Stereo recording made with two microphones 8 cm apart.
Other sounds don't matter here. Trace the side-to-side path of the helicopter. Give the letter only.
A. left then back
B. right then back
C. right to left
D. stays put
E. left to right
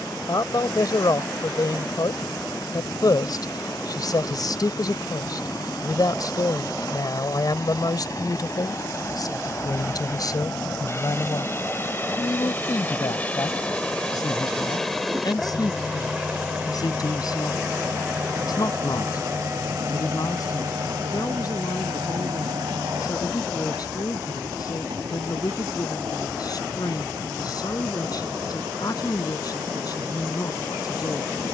E.